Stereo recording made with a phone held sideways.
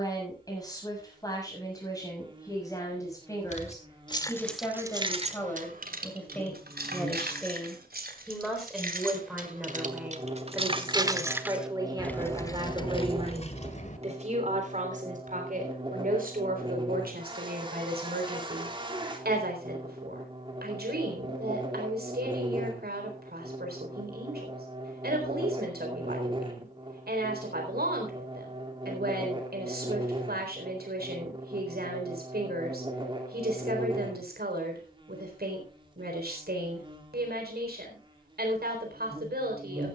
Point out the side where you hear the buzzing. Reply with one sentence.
In this clip you hear the buzzing on the right.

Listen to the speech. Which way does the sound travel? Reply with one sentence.
You can hear the speech go from the left side to the right.